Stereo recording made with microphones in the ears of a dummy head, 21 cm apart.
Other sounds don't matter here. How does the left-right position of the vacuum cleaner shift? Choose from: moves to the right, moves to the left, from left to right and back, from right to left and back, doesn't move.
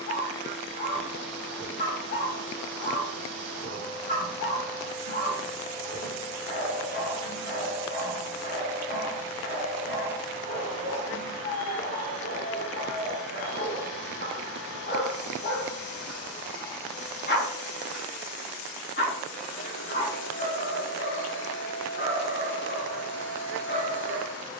doesn't move.